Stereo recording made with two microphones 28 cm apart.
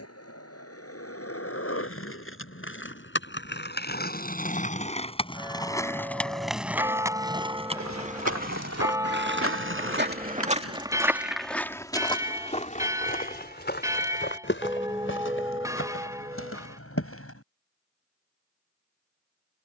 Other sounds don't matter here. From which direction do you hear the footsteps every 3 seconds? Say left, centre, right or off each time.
off, off, right, right, left, left, off.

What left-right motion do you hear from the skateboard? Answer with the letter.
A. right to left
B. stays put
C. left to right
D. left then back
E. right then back
C.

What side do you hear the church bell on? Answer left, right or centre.
centre.